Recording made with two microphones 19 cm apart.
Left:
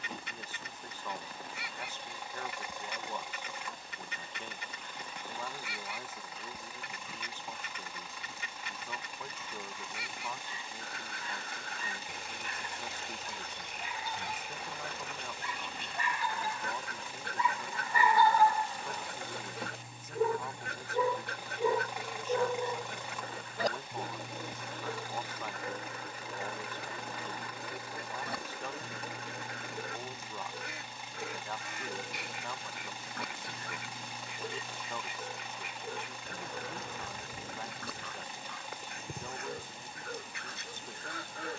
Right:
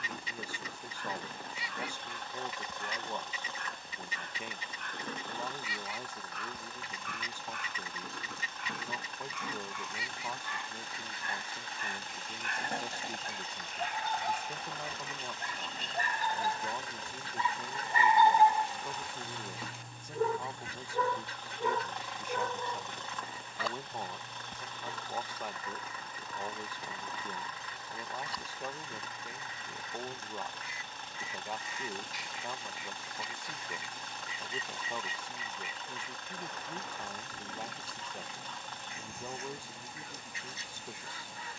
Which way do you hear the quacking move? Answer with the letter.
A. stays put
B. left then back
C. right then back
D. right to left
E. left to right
A.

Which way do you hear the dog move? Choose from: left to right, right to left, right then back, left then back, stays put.
right to left.